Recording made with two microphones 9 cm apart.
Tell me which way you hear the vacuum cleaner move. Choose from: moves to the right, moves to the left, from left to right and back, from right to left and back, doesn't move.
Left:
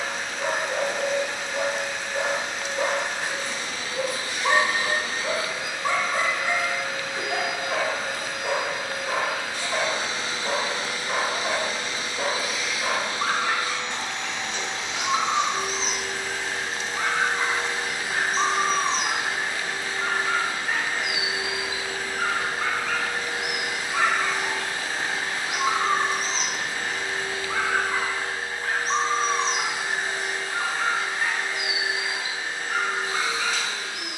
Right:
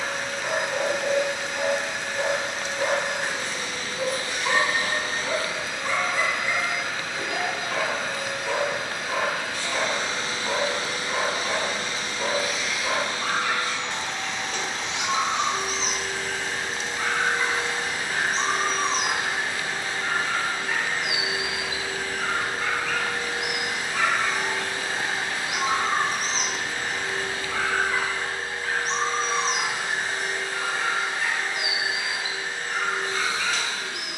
doesn't move.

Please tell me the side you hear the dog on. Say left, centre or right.
left.